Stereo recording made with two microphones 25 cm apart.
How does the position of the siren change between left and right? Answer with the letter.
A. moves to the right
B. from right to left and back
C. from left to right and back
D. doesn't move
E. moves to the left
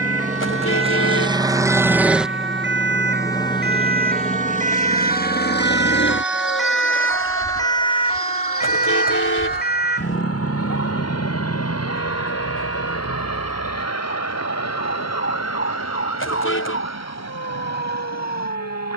E.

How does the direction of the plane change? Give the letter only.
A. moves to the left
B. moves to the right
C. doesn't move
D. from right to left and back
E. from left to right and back
A.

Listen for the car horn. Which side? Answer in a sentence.
In this clip you hear the car horn on the left.